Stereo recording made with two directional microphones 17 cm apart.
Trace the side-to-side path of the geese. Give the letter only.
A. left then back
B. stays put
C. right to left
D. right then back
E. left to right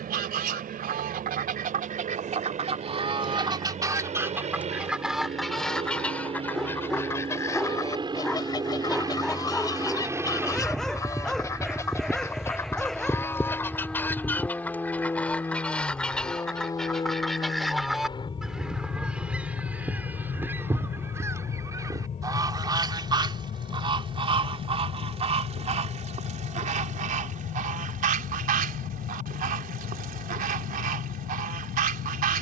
A.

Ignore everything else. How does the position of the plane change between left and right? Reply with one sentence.
In this clip you hear the plane move from right to left.